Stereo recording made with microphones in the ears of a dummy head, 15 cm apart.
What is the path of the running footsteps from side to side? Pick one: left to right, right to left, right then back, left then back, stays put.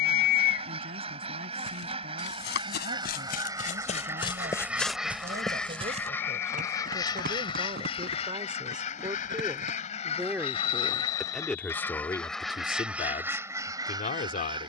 left to right.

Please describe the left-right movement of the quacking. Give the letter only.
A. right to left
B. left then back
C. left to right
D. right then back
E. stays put
B.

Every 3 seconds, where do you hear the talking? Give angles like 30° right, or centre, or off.
60° right, 50° right, 40° right, 10° right, 30° left.